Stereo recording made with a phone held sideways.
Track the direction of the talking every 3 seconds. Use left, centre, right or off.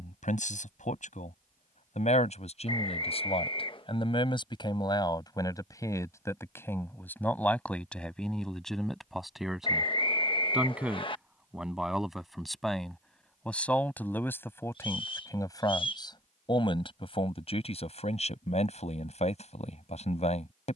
left, left, centre, centre, centre, left, left.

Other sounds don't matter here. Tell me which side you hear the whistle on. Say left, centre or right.
left.